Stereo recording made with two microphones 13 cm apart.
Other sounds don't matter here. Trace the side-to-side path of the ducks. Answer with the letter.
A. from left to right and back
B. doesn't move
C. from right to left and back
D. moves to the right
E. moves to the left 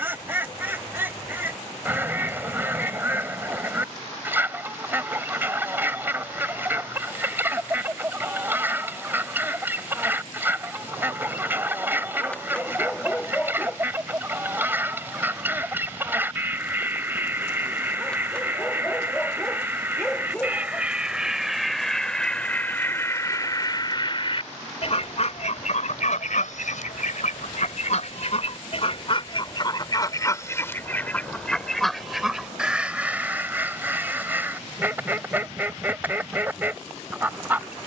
C.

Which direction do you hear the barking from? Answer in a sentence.
You can hear the barking in the centre.